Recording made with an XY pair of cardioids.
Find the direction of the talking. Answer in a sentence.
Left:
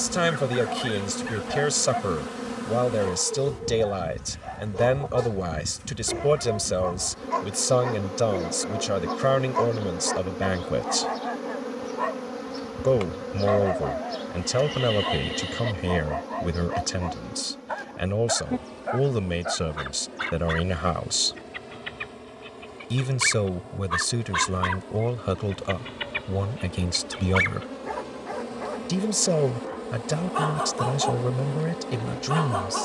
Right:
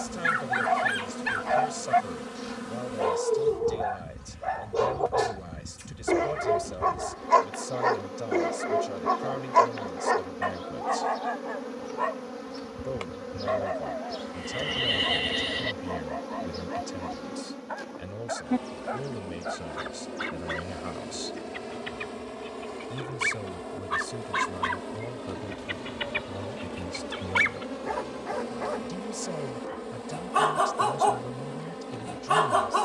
You can hear the talking on the left.